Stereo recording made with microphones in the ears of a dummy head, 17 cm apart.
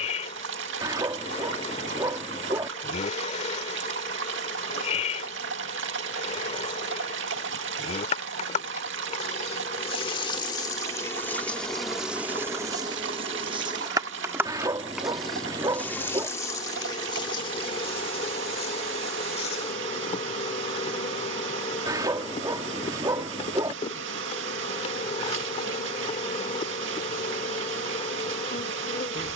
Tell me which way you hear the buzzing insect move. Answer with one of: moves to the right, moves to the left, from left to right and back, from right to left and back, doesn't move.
from left to right and back.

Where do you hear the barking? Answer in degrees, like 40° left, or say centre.
20° right.